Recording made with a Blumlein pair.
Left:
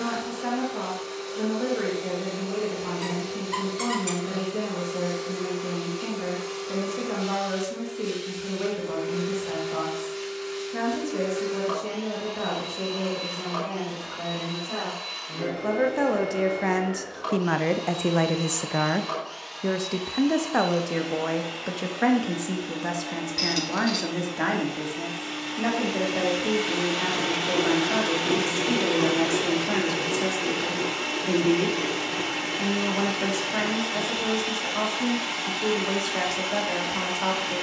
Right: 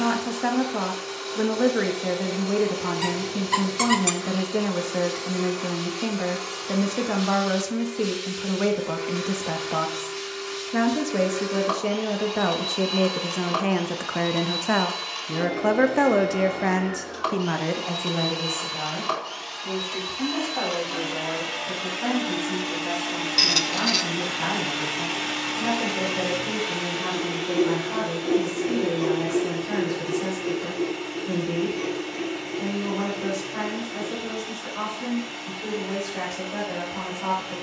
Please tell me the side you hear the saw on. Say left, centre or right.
left.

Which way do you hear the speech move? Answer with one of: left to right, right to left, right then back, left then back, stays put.
right to left.